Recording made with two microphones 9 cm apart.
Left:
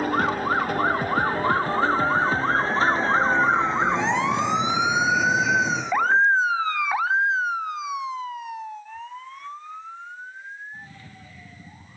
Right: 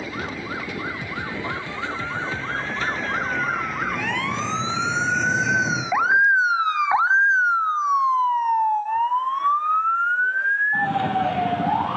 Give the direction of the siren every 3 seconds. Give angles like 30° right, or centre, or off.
40° left, 20° left, 30° right, 60° right.